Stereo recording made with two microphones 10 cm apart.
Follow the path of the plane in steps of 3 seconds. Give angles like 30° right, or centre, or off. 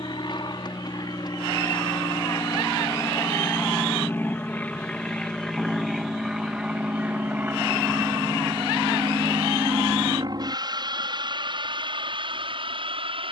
40° left, 10° left, 20° right, 40° right, 50° right.